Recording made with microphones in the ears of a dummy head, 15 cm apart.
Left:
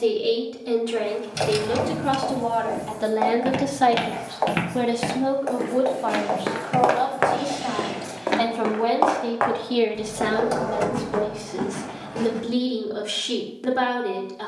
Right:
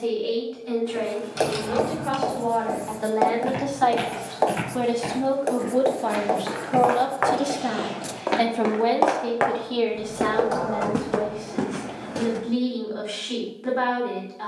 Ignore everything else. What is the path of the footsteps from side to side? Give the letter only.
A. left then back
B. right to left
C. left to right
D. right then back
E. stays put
C.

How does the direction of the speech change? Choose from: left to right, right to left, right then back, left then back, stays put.
right then back.